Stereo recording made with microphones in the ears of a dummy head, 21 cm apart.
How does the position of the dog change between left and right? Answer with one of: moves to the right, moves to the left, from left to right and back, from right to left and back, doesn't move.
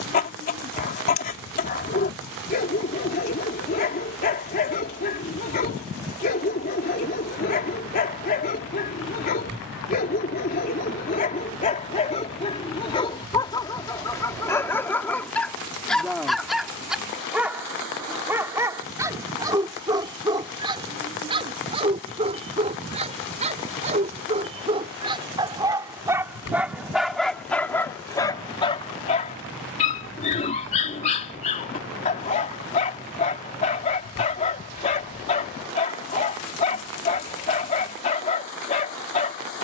from left to right and back.